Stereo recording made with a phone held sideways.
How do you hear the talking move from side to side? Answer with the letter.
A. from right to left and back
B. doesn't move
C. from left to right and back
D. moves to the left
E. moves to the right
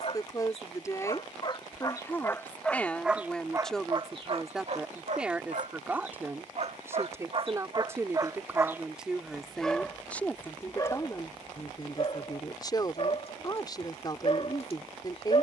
C.